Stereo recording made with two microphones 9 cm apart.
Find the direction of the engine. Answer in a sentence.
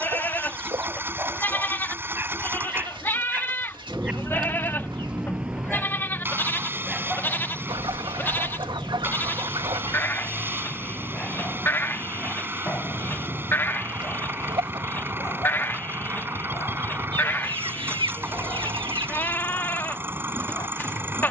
You can hear the engine on the right.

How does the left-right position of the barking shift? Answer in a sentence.
In this clip you hear the barking move from right to left.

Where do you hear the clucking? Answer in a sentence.
You can hear the clucking on the right.